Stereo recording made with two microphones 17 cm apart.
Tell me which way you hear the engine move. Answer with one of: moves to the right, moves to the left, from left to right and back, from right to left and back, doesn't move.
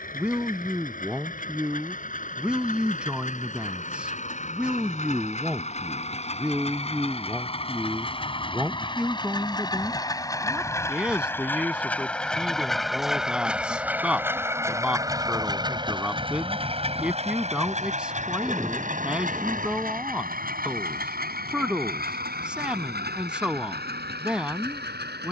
moves to the right.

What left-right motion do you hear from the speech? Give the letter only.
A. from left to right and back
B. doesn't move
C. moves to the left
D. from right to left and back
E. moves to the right
B.